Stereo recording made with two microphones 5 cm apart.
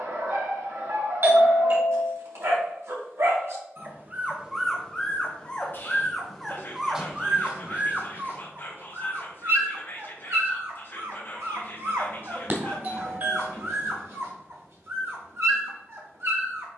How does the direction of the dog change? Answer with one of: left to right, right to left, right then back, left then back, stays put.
left then back.